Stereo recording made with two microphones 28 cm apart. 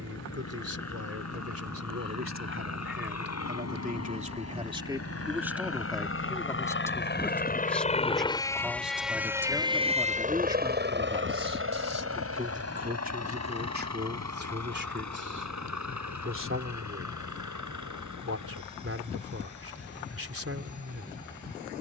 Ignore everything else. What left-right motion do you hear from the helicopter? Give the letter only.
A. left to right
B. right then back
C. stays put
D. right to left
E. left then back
A.